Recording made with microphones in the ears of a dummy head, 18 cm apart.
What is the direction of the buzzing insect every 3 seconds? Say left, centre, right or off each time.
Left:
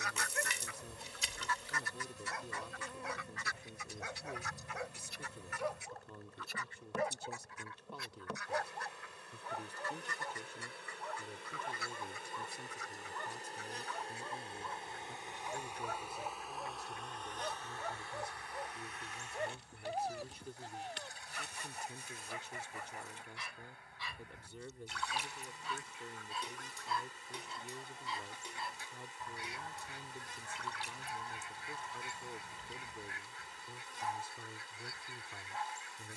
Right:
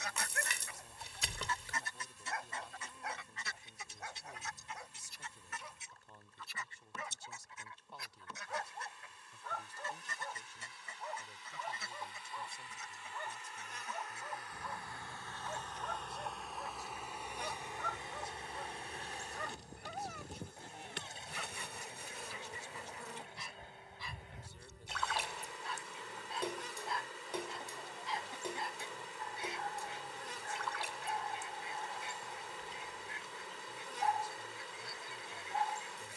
left, left, left, left, left, centre, right, right, right, right, right, right.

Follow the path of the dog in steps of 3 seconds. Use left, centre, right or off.
left, left, left, centre, centre, centre, left, left, left, left, left, left.